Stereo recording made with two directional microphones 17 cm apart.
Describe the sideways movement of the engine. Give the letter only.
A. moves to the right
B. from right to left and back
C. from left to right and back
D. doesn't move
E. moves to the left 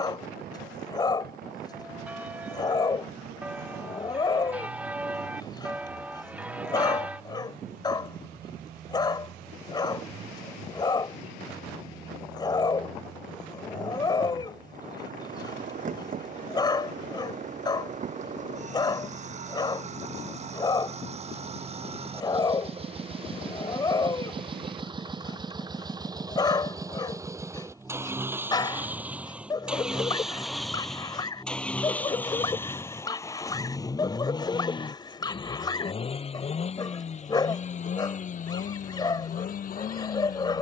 E.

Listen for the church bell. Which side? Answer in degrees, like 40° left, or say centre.
10° right.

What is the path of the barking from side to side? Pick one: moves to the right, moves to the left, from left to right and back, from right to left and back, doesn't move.
doesn't move.